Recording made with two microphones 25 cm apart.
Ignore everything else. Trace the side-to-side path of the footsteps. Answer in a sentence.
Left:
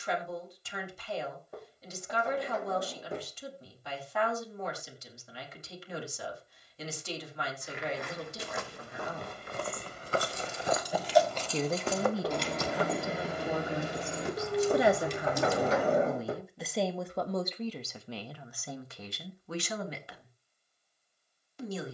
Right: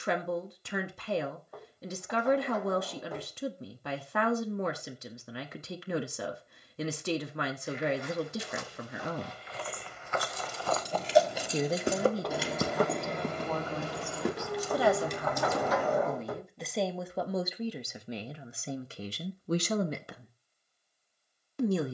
You can hear the footsteps go from the left side to the right.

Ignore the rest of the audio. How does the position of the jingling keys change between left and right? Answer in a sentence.
In this clip you hear the jingling keys travel towards the left.